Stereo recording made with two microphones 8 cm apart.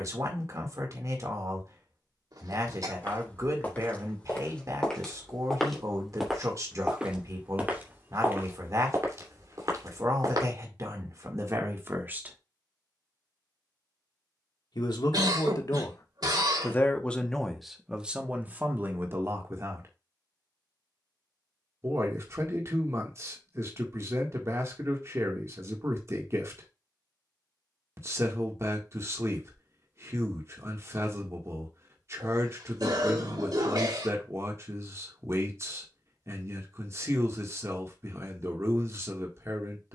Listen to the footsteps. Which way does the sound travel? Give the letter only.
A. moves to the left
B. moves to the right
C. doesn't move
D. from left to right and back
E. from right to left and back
B.